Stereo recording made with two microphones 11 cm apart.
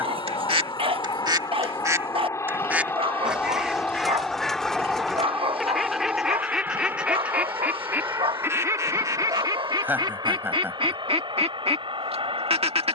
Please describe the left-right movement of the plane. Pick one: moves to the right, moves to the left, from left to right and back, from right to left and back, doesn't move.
moves to the right.